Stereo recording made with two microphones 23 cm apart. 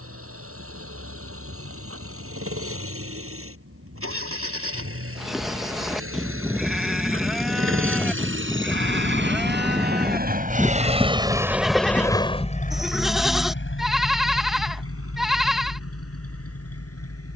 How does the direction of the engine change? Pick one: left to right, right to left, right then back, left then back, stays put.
right to left.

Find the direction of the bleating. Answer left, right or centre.
centre.